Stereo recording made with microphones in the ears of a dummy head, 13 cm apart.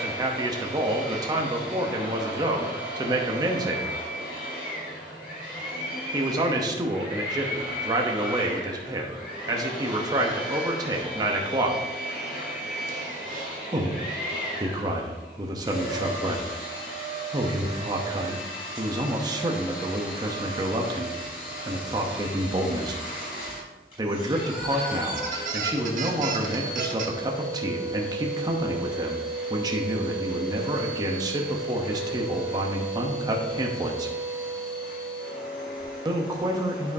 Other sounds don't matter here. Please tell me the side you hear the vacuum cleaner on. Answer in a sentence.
You can hear the vacuum cleaner on the left.